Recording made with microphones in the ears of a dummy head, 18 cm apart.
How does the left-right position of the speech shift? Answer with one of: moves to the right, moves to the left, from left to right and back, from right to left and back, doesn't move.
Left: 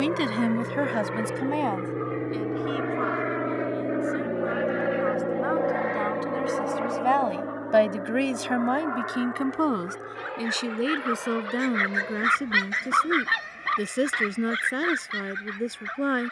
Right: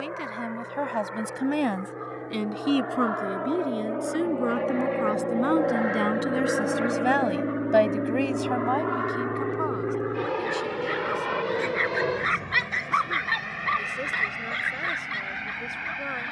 from left to right and back.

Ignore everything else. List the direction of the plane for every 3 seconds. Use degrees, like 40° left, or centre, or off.
50° left, 20° left, 30° right, 60° right, 70° right, 70° right.